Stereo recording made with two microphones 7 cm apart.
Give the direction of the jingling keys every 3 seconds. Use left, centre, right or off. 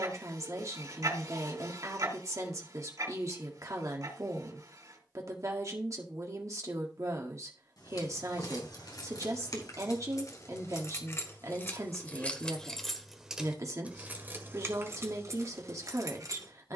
off, off, left, left, centre, right.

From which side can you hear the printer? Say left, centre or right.
right.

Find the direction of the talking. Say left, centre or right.
right.